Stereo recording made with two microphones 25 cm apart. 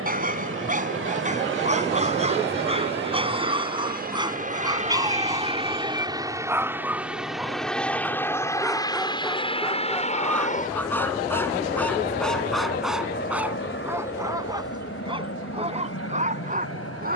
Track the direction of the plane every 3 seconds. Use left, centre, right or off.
right, right, centre, left, left, left.